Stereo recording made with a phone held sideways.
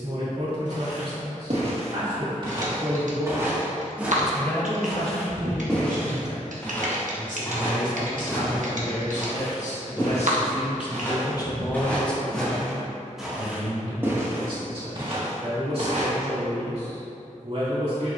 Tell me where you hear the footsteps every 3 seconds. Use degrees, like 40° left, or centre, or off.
50° right, centre, 20° left, 20° left, 10° right, 50° right.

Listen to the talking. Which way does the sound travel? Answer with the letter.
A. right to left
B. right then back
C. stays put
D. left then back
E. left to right
D.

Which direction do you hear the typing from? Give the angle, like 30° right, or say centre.
70° right.